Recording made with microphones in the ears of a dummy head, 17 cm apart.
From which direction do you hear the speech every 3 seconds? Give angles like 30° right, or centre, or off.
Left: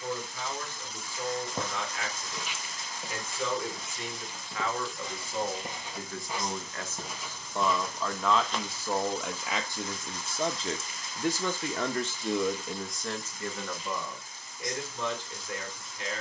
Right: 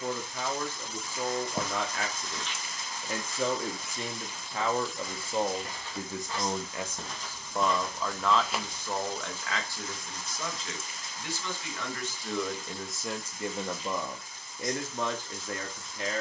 40° right, 30° right, 10° right, 20° left, 10° right, 40° right.